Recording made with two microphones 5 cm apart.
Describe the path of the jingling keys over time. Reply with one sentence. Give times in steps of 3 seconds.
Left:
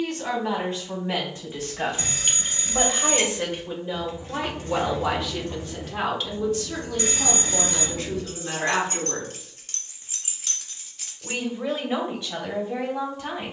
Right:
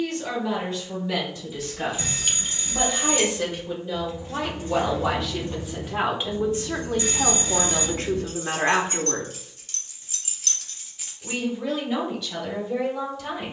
In this clip you hear the jingling keys in the centre from 0 s, on the left from 3 s and not at all from 12 s.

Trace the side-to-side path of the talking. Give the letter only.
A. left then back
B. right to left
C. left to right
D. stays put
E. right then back
E.